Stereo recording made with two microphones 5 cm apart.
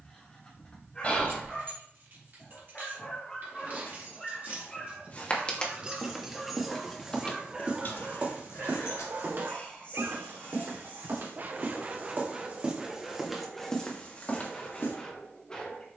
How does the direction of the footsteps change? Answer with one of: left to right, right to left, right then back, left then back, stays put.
right then back.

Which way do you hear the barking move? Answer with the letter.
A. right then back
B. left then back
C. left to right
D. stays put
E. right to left
A.